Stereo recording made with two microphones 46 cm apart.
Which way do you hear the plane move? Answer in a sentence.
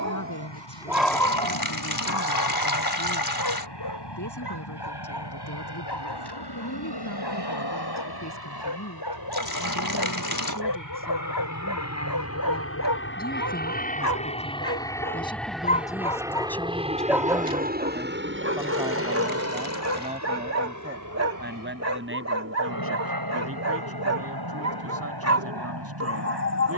In this clip you hear the plane move from left to right.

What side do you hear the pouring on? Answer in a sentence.
You can hear the pouring on the left.